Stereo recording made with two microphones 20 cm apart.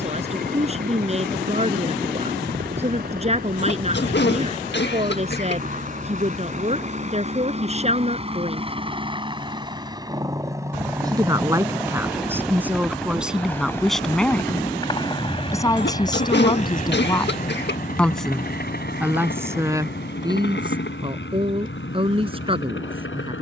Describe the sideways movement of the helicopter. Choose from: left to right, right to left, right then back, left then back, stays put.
right to left.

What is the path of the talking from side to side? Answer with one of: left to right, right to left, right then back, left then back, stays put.
left then back.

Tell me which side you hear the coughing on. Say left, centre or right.
left.